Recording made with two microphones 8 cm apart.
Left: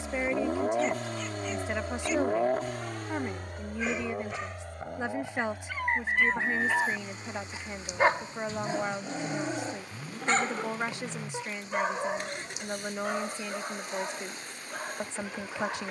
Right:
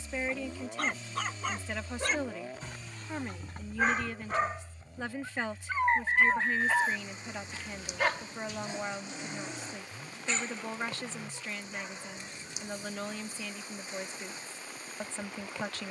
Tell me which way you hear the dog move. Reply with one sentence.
You can hear the dog move from right to left.